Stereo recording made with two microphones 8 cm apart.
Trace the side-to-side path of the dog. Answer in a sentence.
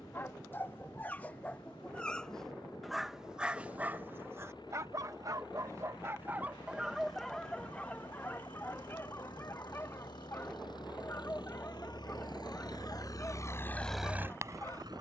You can hear the dog go right and come back.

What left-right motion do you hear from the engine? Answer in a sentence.
You can hear the engine go from the left side to the right.